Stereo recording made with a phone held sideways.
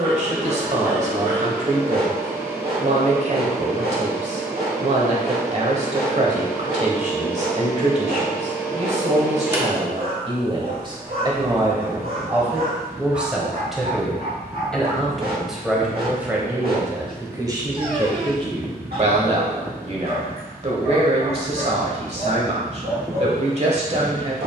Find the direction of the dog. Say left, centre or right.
right.